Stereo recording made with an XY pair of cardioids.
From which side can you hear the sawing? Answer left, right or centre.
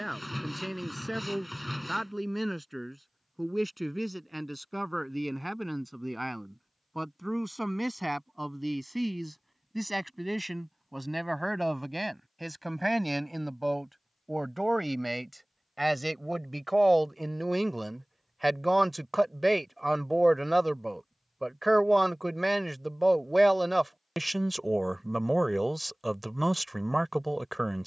centre.